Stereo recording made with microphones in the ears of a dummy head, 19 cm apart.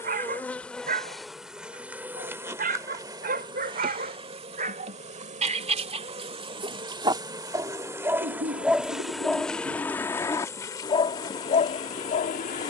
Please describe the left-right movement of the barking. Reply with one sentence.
In this clip you hear the barking move from right to left.